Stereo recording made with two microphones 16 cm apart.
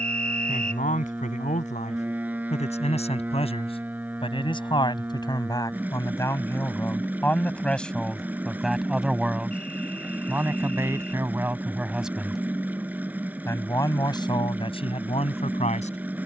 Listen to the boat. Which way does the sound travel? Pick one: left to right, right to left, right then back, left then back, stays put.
stays put.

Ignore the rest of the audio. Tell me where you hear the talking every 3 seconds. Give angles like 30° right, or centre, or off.
50° left, 30° left, 10° left, 10° right, 20° left, 40° left.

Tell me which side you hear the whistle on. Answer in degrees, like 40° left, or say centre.
50° right.